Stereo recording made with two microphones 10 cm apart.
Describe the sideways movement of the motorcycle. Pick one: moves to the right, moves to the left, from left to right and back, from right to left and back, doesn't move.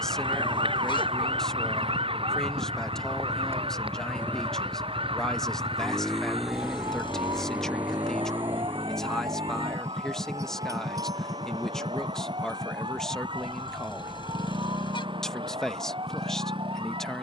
moves to the right.